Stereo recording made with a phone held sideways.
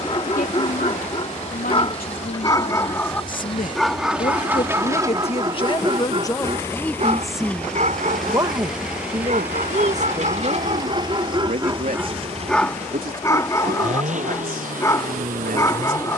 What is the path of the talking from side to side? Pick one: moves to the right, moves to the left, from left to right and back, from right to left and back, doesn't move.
moves to the right.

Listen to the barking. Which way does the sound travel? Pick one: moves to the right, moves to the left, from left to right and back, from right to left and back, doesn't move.
from left to right and back.